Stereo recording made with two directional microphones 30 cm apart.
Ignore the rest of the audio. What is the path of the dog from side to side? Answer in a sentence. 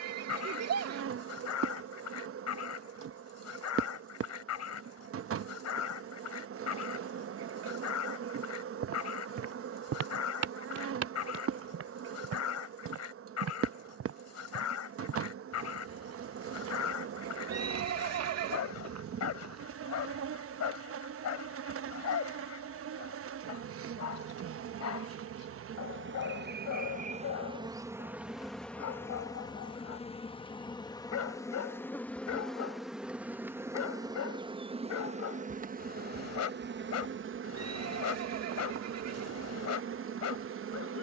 In this clip you hear the dog stay put.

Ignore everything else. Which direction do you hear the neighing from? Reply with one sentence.
You can hear the neighing on the right.